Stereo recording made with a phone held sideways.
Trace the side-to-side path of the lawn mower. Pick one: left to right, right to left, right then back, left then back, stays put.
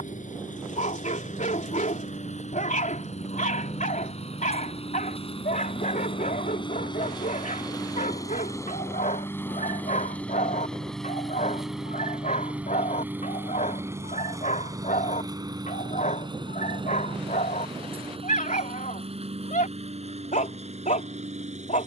left to right.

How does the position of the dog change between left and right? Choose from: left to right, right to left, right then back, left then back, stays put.
stays put.